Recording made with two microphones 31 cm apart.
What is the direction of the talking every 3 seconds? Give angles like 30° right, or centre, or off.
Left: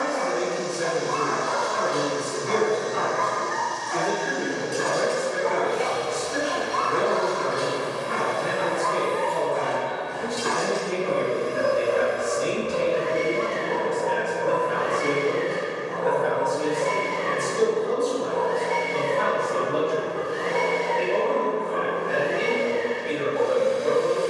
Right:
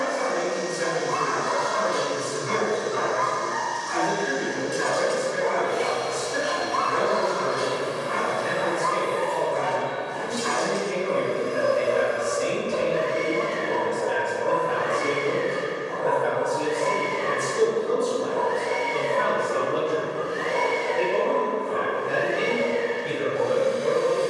50° left, 50° left, 50° left, 50° left, 40° left, centre, 30° right, 40° right.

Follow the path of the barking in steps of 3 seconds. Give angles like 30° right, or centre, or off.
30° right, centre, 40° left, 70° left, 70° left, 70° left, 70° left, 70° left.